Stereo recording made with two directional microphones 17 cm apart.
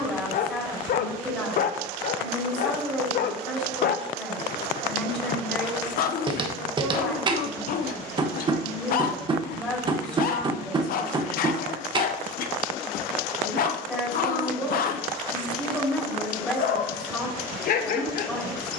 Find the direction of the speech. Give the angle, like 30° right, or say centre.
10° left.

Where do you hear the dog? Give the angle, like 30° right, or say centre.
60° left.